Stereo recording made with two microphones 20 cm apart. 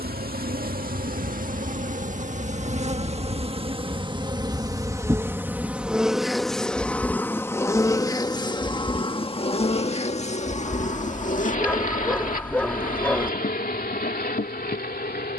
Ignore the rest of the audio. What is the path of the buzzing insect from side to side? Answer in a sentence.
You can hear the buzzing insect move from right to left.